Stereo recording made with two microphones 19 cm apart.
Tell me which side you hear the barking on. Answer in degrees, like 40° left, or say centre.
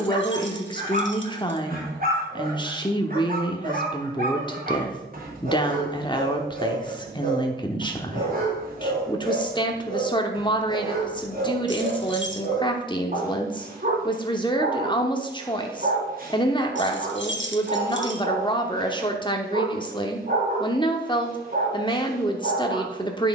50° right.